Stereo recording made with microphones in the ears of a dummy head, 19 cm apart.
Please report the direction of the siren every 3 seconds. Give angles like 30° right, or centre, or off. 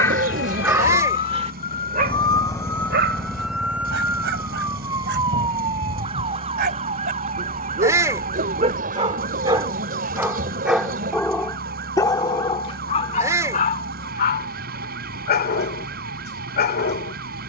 30° left, 10° right, 30° right, 40° right, 50° right, 50° right.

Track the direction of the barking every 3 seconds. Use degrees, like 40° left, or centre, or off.
20° right, 60° right, 40° right, 10° right, 30° left, 50° left.